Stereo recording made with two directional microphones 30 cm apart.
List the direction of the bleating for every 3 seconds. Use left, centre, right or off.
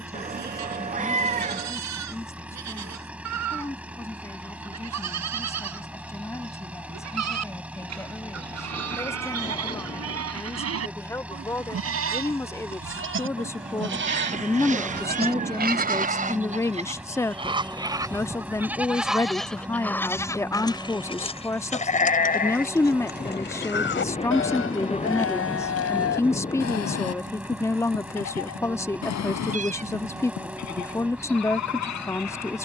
right, right, right, right, right, right, centre, left, left, left, left.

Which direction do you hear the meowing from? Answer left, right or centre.
right.